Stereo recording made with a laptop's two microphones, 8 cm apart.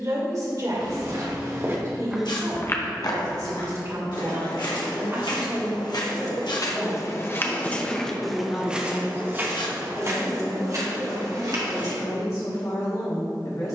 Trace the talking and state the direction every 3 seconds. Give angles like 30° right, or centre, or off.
50° right, 40° right, 10° left, 50° left, 60° left.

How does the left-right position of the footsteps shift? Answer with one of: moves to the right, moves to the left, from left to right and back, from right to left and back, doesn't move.
from right to left and back.